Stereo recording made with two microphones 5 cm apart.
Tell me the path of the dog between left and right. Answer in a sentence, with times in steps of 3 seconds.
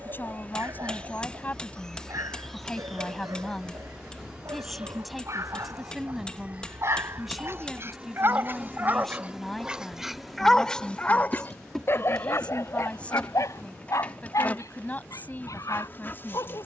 In this clip you hear the dog on the right from 0 s, in the centre from 9 s and on the left from 12 s.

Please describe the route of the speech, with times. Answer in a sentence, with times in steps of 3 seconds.
In this clip you hear the speech on the left from 0 s, in the centre from 3 s and on the left from 12 s.